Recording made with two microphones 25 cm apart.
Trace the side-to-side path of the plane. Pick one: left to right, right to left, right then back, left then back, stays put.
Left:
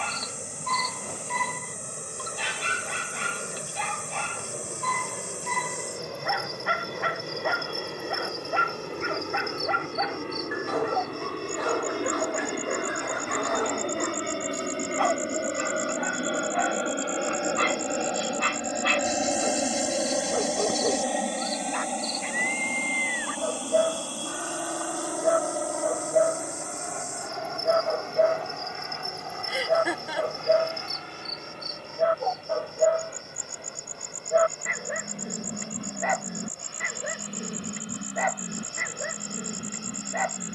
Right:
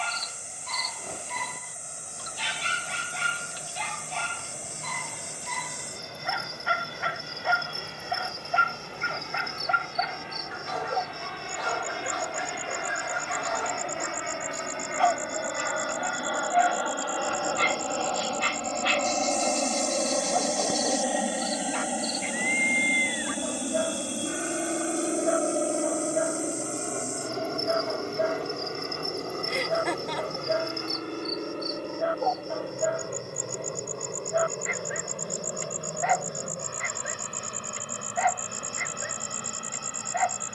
left to right.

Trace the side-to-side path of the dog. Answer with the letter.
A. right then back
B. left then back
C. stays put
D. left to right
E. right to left
C.